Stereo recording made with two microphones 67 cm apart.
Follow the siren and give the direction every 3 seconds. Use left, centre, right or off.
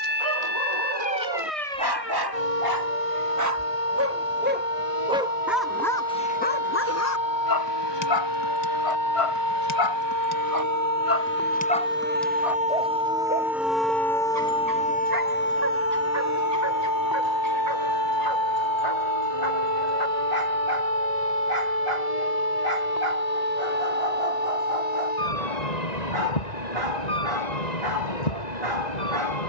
right, right, right, right, centre, left, left, left, left, left.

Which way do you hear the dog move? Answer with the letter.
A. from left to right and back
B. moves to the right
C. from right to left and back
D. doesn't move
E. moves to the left
C.